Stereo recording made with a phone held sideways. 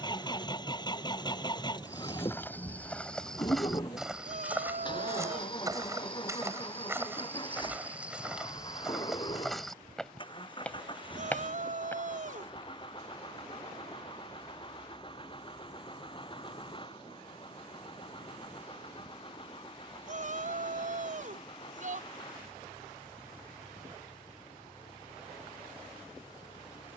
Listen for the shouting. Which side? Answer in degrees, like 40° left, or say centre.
60° right.